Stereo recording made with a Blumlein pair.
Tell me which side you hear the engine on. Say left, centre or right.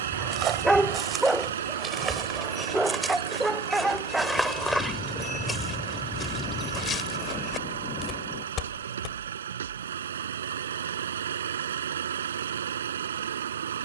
right.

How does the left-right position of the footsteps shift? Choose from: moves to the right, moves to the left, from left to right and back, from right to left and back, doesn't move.
moves to the left.